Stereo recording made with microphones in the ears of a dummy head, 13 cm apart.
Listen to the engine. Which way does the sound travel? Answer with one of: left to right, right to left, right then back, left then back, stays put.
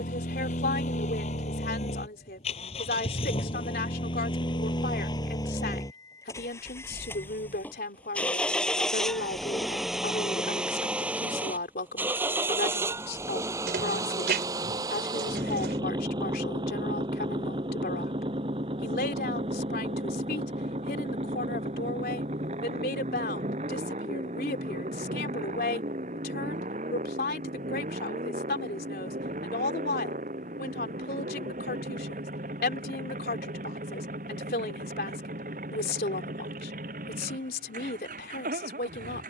left to right.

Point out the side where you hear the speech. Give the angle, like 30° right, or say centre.
70° left.